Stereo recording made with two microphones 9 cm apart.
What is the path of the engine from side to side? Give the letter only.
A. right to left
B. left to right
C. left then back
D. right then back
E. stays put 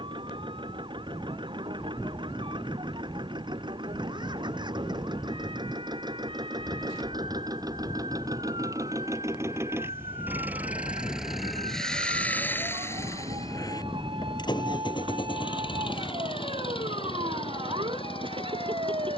A.